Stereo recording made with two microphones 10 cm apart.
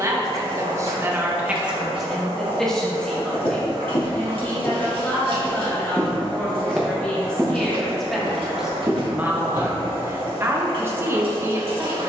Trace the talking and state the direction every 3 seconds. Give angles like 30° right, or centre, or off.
10° right, 20° left, 10° left, 20° right.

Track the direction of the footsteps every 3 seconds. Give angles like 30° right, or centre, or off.
off, 40° left, 20° right, 60° right.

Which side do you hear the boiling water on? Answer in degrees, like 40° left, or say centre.
60° right.